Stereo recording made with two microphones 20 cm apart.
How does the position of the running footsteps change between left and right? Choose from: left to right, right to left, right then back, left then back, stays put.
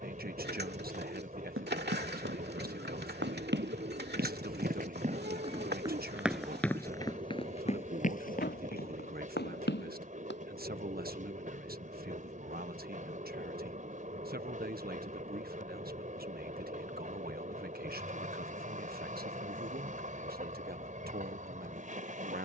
right to left.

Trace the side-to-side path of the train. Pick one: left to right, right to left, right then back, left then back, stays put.
stays put.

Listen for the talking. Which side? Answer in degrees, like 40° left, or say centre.
50° right.